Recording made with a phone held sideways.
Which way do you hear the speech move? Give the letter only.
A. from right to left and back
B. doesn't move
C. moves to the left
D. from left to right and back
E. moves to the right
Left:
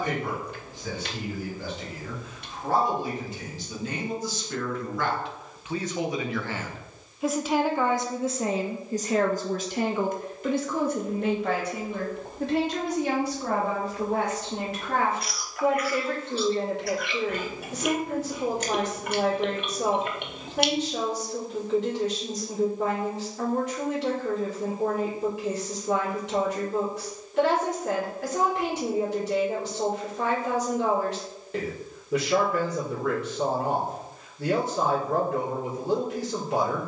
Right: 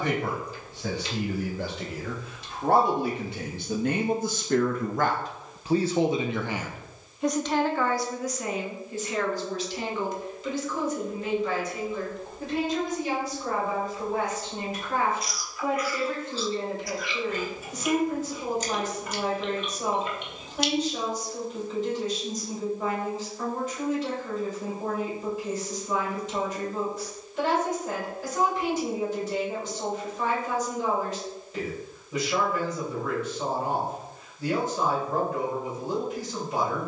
C.